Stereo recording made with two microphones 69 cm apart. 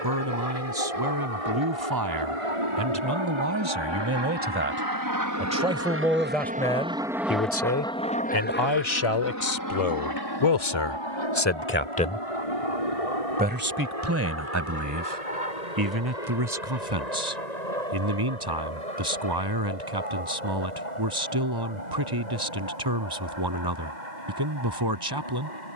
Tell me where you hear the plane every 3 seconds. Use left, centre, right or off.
right, right, centre, left, left, left, left, left, left.